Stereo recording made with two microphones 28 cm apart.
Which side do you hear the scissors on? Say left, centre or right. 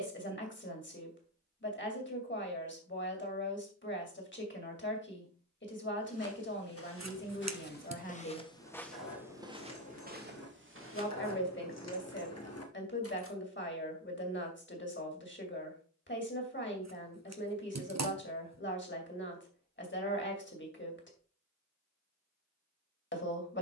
right.